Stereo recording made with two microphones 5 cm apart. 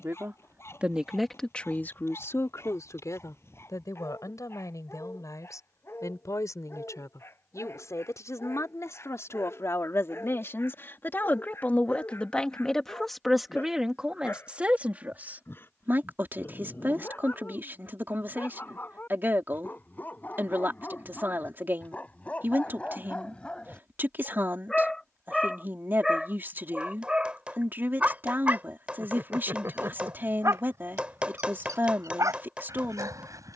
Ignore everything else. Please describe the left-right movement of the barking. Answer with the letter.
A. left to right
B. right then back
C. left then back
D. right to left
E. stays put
A.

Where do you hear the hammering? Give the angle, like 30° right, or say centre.
20° right.